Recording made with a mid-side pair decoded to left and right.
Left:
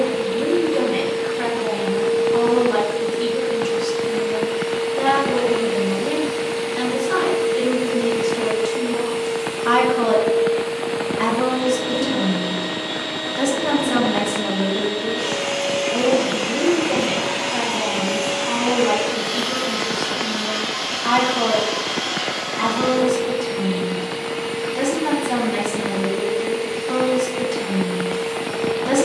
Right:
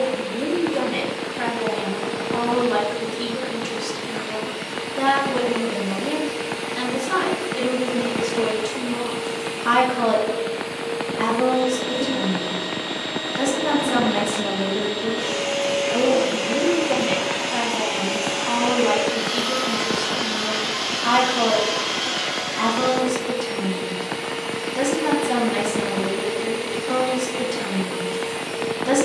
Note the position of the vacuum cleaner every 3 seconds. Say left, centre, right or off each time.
left, left, left, left, left, left, centre, right, right, right.